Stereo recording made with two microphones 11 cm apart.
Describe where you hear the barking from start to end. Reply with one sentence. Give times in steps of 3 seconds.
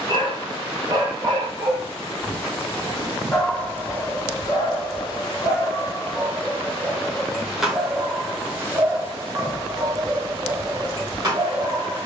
You can hear the barking on the right from 0 s, on the left from 3 s, in the centre from 6 s and on the right from 9 s.